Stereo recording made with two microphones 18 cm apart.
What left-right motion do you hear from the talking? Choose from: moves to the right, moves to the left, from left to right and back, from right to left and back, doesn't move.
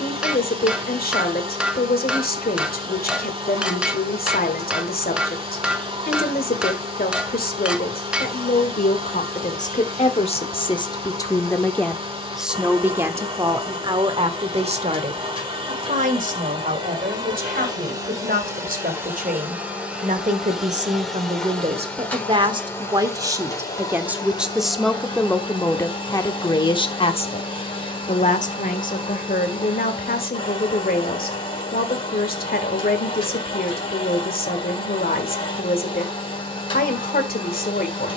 from left to right and back.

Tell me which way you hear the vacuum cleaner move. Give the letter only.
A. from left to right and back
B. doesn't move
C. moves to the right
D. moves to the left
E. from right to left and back
D.